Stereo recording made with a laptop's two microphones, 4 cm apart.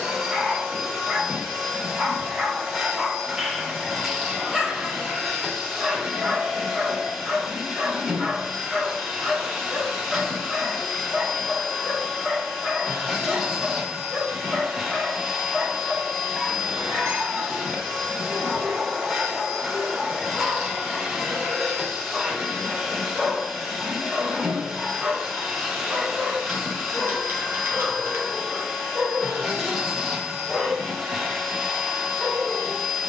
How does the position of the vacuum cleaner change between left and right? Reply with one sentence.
In this clip you hear the vacuum cleaner stay put.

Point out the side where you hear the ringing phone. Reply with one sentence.
You can hear the ringing phone on the right.